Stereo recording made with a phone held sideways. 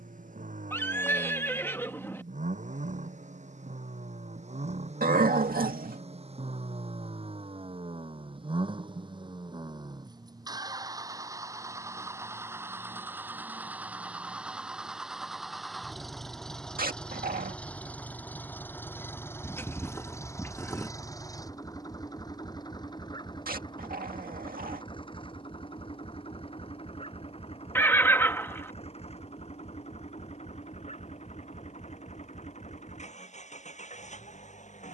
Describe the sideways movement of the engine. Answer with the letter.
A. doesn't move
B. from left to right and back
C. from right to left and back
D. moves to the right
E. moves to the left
E.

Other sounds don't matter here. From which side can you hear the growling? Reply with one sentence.
In this clip you hear the growling on the right.